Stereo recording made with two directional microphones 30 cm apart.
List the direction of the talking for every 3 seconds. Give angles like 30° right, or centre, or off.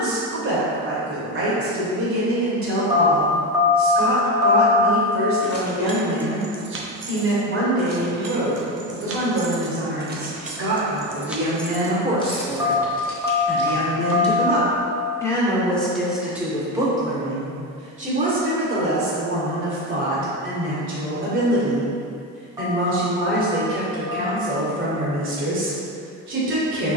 50° right, 50° right, 50° right, 40° right, centre, centre, 40° right, 40° right, 40° right.